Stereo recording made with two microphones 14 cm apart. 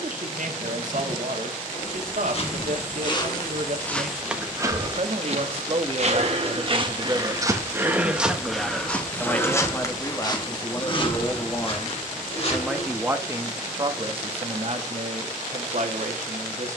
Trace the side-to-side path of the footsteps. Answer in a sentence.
In this clip you hear the footsteps go right and come back.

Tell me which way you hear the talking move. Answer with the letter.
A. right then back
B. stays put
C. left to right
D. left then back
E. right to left
D.